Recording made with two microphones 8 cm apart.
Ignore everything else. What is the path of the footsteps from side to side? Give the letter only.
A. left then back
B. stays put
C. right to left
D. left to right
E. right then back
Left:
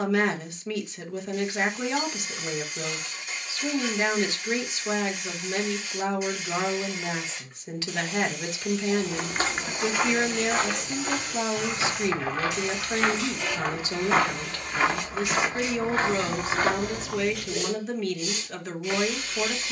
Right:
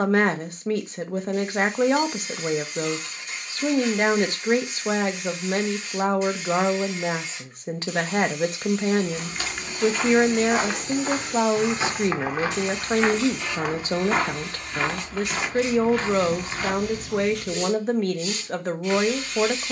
E.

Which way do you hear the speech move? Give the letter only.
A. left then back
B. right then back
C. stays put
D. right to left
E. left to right
C.